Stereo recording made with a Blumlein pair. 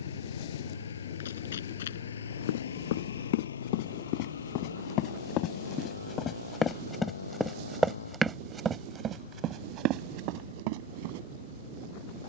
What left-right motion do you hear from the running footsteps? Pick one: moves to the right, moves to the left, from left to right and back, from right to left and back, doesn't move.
moves to the right.